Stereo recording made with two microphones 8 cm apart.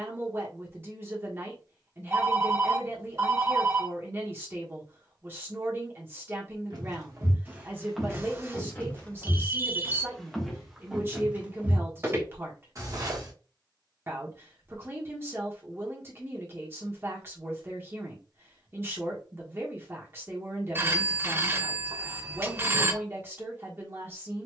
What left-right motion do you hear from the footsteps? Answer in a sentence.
You can hear the footsteps go left and come back.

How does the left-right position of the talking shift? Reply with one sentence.
You can hear the talking stay put.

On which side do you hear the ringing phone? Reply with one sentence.
In this clip you hear the ringing phone on the right.